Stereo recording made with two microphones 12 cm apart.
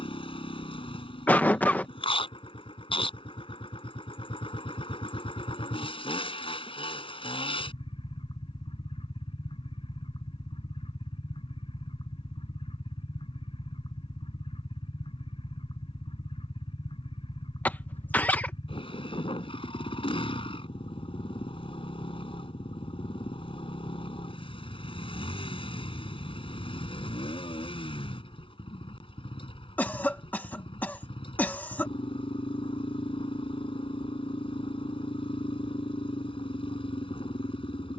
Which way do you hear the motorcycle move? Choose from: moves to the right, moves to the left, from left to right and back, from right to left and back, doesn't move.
doesn't move.